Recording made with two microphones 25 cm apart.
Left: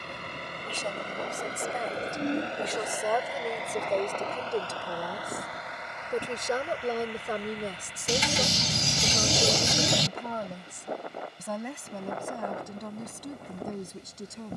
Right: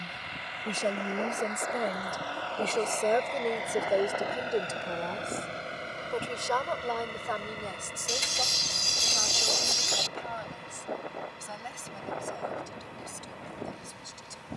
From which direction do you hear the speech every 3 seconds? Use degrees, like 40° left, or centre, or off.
40° right, 10° right, 30° left, 50° left, 60° left.